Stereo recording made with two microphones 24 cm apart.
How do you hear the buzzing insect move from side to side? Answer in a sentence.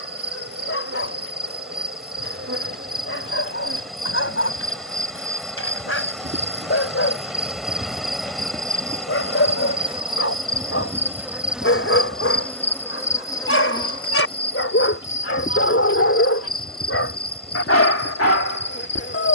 You can hear the buzzing insect travel towards the left.